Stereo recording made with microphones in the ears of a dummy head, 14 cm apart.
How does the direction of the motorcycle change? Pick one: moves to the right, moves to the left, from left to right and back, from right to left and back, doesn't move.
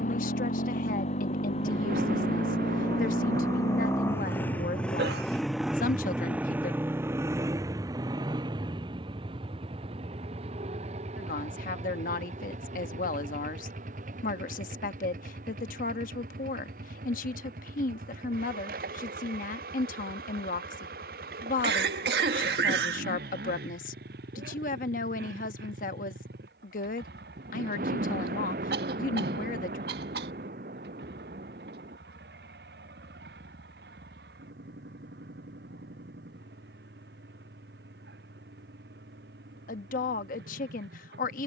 moves to the right.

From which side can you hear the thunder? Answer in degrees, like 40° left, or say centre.
60° right.